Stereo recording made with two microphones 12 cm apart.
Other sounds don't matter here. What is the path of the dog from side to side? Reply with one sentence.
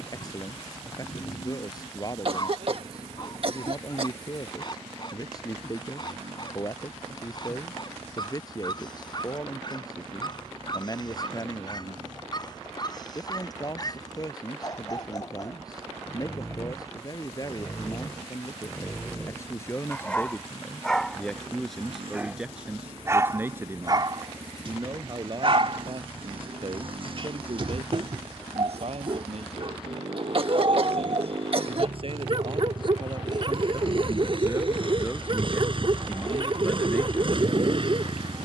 You can hear the dog move from left to right.